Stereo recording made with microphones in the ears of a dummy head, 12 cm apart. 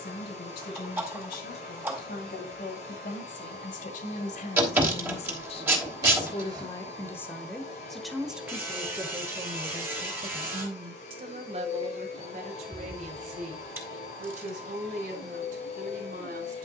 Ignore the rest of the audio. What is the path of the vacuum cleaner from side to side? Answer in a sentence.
You can hear the vacuum cleaner stay put.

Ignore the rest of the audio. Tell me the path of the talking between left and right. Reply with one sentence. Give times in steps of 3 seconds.
In this clip you hear the talking on the left from 0 s, in the centre from 6 s and on the right from 9 s.